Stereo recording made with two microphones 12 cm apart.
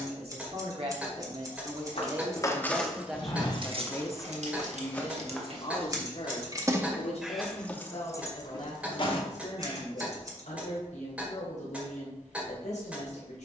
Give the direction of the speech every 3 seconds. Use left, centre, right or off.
right, left, left, left, left.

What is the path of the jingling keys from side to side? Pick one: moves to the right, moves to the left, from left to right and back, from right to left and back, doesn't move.
from left to right and back.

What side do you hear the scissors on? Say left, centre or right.
right.